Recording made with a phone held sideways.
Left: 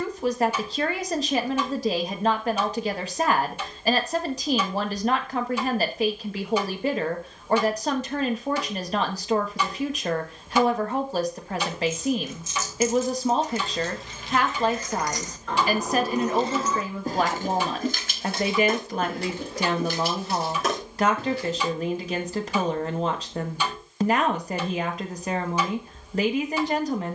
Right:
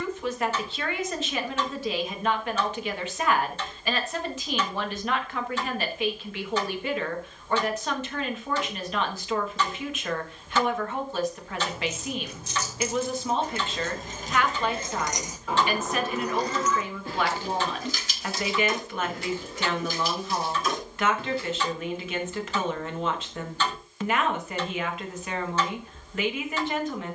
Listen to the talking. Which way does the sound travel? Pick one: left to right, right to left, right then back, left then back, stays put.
stays put.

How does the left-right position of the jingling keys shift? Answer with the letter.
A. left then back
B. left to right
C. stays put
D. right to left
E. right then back
D.